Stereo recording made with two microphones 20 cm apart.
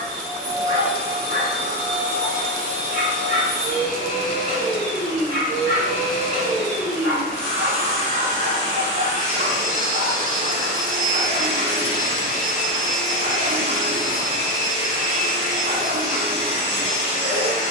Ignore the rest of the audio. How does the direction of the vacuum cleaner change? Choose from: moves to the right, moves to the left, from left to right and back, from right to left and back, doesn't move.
doesn't move.